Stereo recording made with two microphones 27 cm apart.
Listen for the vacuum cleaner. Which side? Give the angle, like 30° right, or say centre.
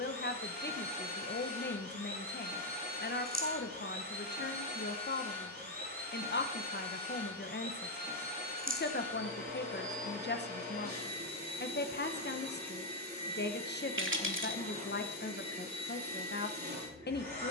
40° right.